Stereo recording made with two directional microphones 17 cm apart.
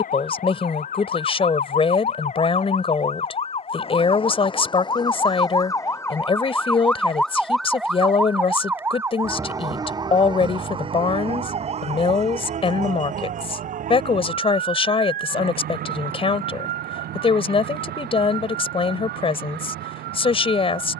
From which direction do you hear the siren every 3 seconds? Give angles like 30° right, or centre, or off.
50° left, 30° left, centre, 30° right, 50° right, 60° right, 70° right.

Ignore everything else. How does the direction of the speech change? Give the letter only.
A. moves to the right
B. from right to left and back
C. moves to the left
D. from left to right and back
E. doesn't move
E.